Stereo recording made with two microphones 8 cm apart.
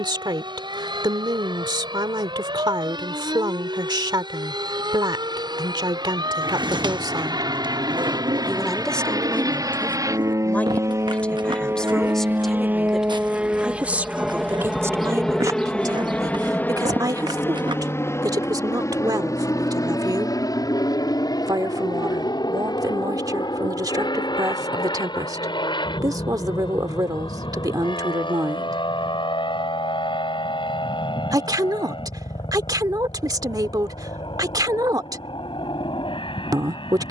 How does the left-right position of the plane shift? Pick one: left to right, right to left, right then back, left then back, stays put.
right to left.